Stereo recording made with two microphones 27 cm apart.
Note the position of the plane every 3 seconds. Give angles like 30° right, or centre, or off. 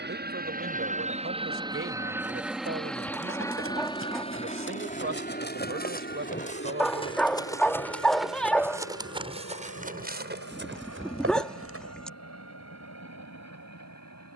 20° right, 20° left, 40° left, 50° left, 60° left.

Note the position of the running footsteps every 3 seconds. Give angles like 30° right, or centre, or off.
50° left, 40° left, 10° left, 40° right, off.